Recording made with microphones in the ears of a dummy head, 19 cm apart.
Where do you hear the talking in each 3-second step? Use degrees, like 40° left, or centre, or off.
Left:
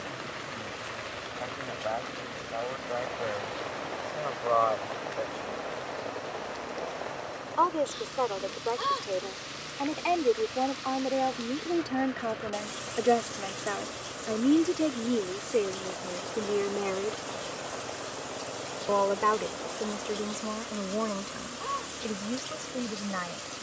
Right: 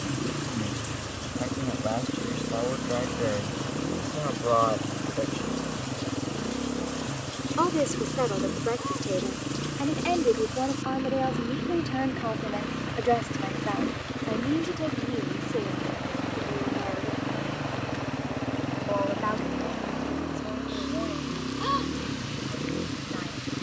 50° right, 50° right, 30° right, 10° right, 20° left, 40° left, 60° left, 70° left.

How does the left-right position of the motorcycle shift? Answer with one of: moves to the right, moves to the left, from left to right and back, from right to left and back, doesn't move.
doesn't move.